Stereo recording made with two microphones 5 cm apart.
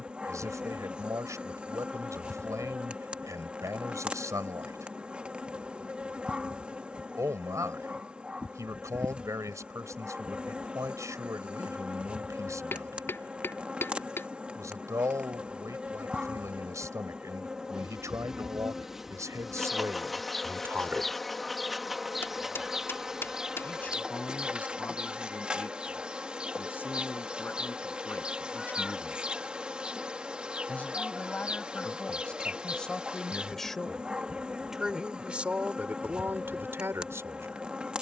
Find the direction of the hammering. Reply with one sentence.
In this clip you hear the hammering on the left.